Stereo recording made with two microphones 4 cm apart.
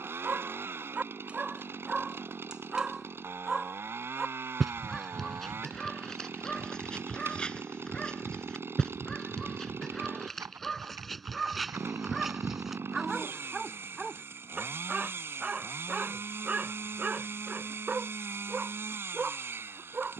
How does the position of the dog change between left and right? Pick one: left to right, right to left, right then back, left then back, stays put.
left then back.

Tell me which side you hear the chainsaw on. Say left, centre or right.
right.